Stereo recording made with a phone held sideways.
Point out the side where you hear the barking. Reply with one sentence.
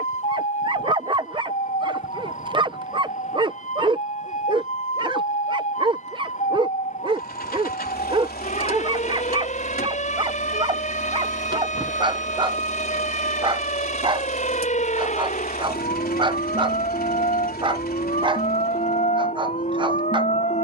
In this clip you hear the barking on the right.